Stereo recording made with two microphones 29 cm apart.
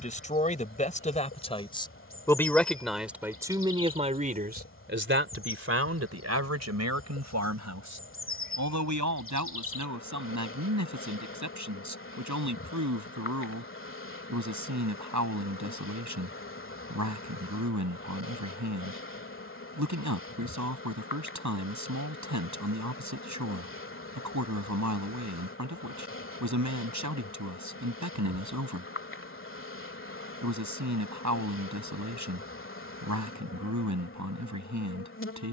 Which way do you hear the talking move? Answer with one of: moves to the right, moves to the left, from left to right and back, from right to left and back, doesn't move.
moves to the right.